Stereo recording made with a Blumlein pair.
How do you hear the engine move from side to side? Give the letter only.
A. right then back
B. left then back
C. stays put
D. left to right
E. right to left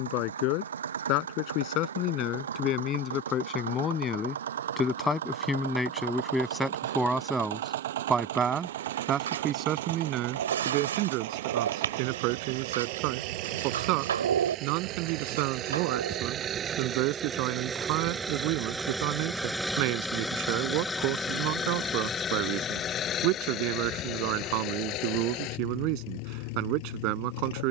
E.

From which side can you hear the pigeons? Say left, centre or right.
right.